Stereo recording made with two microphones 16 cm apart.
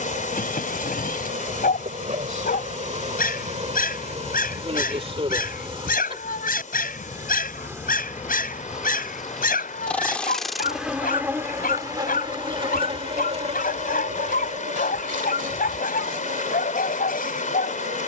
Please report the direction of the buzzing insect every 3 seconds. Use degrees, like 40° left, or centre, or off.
50° right, 40° right, 20° right, centre, 40° right, 60° right.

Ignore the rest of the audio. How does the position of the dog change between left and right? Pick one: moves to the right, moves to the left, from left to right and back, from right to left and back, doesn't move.
doesn't move.